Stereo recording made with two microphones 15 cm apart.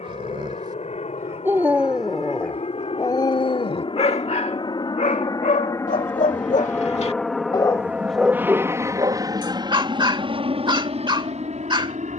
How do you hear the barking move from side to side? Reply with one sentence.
You can hear the barking go left and come back.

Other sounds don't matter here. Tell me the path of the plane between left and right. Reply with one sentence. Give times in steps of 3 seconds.
In this clip you hear the plane on the left from 0 s, in the centre from 6 s and on the right from 9 s.